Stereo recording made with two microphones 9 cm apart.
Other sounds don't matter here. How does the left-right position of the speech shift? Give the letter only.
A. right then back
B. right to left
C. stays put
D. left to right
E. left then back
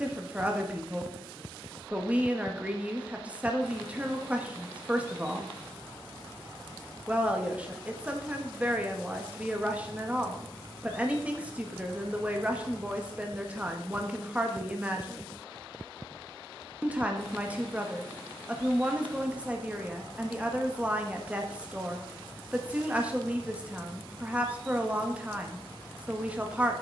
C.